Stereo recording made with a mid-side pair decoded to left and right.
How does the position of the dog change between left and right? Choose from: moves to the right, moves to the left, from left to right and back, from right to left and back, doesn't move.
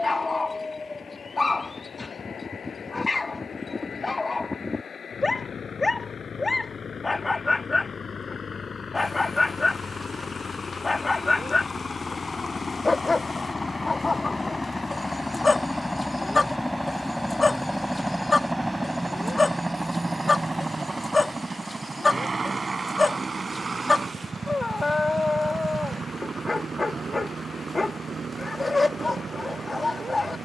doesn't move.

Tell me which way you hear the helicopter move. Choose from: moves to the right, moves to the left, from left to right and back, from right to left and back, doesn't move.
moves to the right.